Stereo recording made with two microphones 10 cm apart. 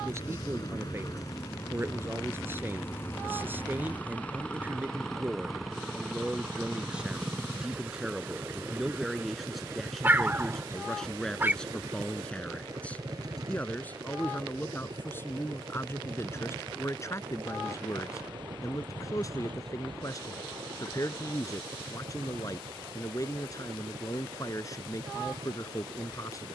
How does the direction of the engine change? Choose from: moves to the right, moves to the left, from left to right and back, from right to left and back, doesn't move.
moves to the right.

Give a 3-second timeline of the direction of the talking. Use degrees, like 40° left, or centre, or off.
20° right, 20° right, 10° right, centre, 20° left, 30° left, 40° left, 40° left, 40° left.